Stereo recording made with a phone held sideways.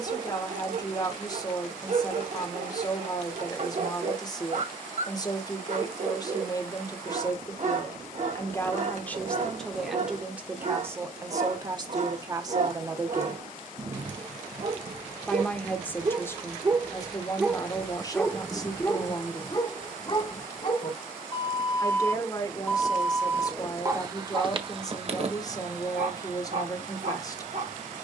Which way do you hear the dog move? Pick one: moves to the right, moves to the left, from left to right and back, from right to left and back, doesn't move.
from right to left and back.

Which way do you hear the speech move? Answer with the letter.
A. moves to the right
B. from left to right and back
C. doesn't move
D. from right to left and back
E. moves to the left
B.